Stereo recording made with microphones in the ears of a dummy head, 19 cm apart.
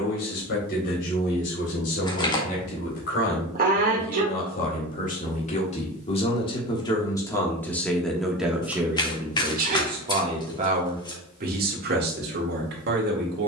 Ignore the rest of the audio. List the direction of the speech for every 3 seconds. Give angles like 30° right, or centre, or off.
60° left, 40° left, 10° left, 30° right, 50° right.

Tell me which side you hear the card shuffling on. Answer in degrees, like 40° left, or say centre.
20° left.